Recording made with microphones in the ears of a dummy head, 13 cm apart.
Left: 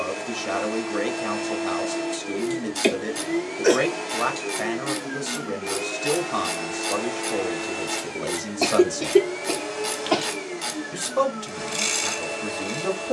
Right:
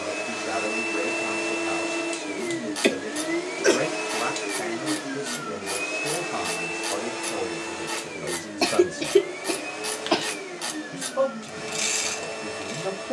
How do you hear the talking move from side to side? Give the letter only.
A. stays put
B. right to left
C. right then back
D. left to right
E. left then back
A.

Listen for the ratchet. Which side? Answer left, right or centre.
centre.